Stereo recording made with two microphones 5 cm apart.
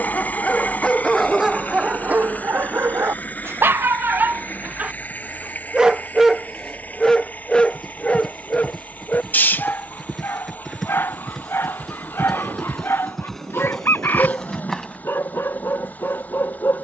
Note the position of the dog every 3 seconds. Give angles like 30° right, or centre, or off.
10° right, 30° right, 10° left, 40° left, 50° left, 50° left.